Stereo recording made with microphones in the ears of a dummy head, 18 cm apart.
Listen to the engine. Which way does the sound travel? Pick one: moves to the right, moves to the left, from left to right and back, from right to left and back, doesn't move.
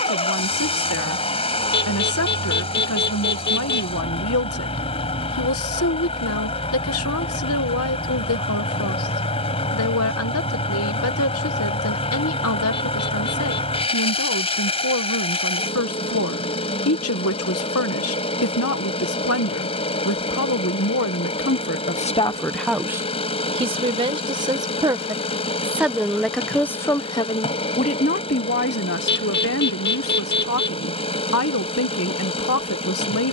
doesn't move.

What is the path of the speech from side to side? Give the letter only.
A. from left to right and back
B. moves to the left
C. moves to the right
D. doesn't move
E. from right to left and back
A.